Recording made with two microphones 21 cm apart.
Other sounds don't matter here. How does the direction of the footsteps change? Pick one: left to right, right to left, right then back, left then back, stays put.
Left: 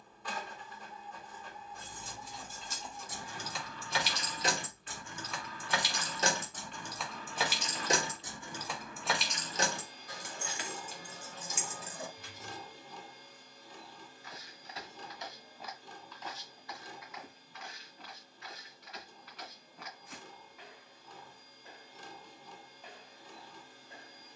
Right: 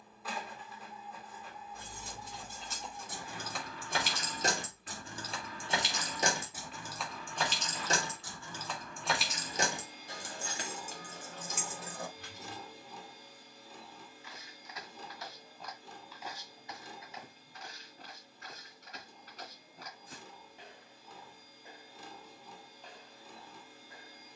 right then back.